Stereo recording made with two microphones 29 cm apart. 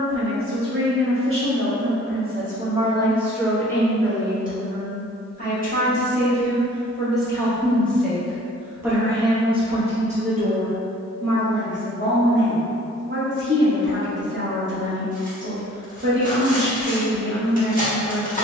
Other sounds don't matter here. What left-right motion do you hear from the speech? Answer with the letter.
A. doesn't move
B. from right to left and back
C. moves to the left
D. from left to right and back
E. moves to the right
B.